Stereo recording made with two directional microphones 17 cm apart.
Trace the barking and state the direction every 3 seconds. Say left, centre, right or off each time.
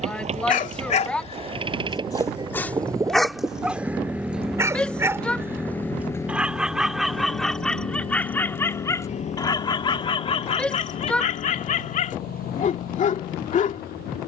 left, centre, centre, left, left.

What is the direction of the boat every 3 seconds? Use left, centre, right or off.
right, centre, left, left, left.